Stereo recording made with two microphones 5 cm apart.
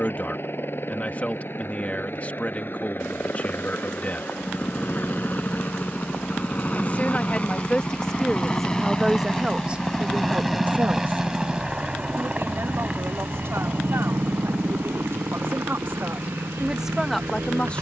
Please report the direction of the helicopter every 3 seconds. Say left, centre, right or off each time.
left, left, left, centre, right, right.